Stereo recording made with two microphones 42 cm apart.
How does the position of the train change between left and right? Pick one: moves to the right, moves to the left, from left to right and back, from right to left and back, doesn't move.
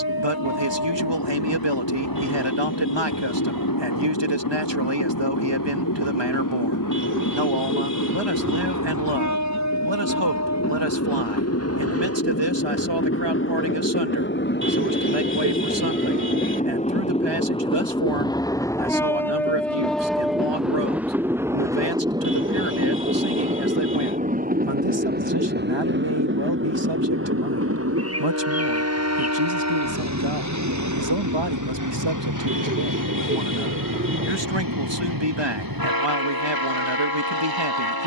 moves to the right.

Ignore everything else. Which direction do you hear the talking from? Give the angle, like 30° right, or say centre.
80° right.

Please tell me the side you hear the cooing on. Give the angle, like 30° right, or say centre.
30° right.